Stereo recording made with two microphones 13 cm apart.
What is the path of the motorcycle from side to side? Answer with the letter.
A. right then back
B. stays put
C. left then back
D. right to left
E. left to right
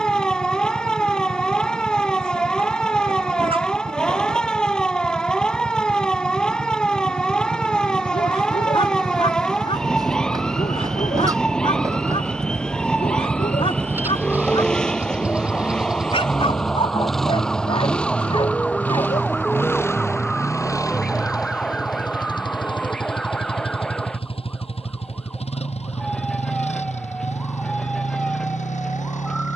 D.